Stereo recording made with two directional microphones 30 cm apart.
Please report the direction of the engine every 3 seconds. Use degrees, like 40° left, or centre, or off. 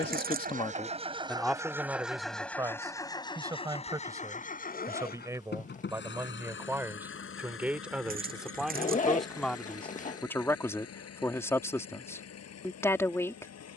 10° right, 30° left, 40° left, 50° left, 60° left.